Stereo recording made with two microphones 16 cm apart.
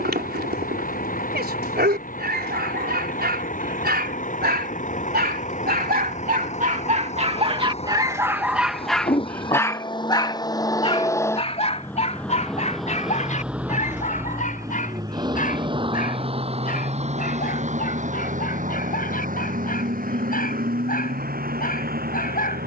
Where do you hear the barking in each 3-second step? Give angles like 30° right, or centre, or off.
80° right, 80° right, 30° right, 30° left, 50° left, 60° left, 60° left, 60° left.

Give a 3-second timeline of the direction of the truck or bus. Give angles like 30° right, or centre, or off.
60° left, 50° left, 40° left, 20° left, 10° right, 40° right, 60° right, 70° right.